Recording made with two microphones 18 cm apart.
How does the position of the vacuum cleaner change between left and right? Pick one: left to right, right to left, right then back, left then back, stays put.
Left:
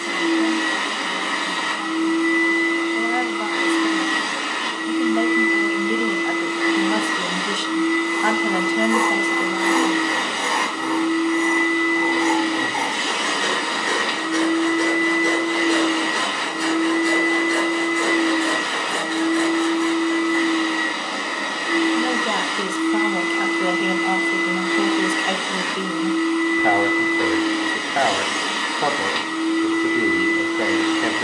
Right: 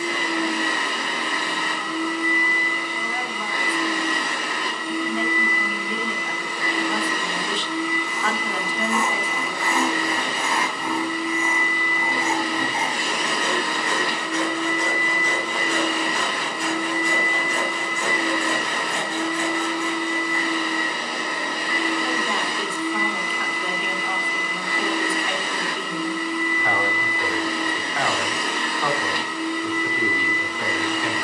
stays put.